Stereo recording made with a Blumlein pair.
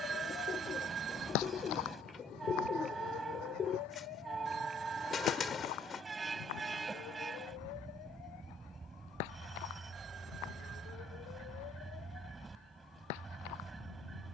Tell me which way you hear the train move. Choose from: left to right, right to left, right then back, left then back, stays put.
stays put.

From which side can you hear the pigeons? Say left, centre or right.
left.